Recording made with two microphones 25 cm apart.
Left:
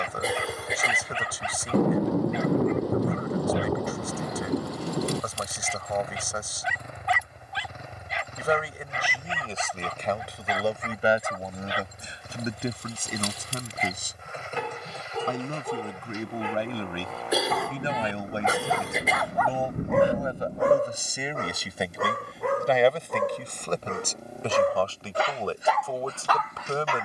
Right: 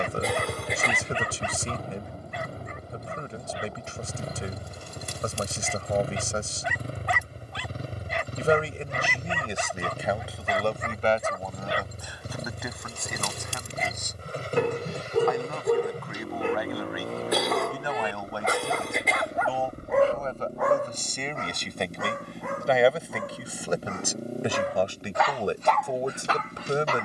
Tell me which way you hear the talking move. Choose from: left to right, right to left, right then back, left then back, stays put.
left then back.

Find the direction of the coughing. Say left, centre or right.
centre.